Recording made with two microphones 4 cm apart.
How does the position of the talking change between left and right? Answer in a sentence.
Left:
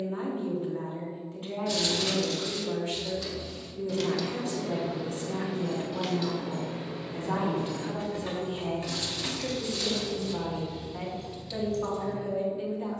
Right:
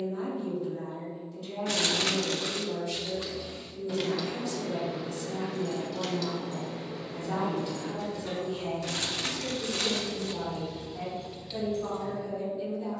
You can hear the talking stay in one place.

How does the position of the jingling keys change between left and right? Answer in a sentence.
You can hear the jingling keys move from right to left and back again.